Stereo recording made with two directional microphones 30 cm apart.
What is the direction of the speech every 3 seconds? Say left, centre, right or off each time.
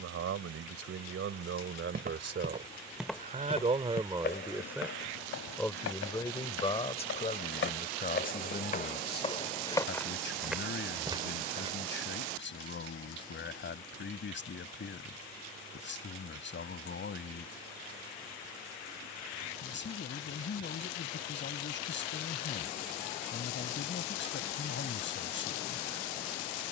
right, centre, left, left, left, left, left, left, left.